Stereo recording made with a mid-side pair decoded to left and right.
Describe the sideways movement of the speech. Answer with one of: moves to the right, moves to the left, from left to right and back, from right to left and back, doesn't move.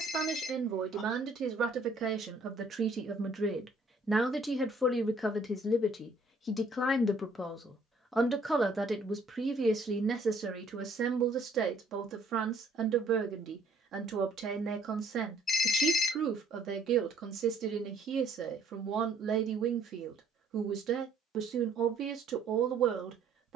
from right to left and back.